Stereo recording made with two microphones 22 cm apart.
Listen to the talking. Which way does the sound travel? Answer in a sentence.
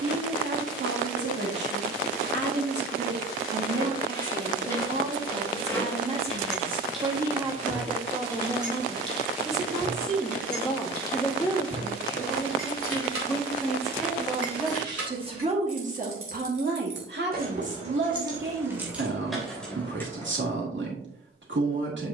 You can hear the talking go left and come back.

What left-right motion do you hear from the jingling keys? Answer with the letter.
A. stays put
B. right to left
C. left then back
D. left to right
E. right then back
E.